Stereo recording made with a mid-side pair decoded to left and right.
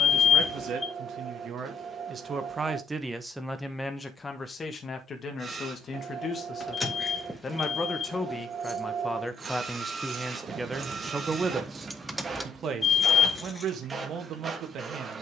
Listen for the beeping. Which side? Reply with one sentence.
In this clip you hear the beeping on the left.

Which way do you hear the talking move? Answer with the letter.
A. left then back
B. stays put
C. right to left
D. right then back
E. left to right
A.